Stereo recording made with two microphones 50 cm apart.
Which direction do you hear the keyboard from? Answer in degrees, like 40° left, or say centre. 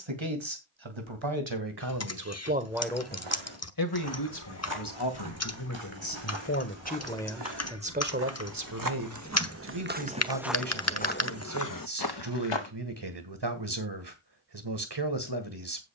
30° left.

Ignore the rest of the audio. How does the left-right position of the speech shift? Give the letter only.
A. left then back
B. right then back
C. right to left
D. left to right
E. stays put
A.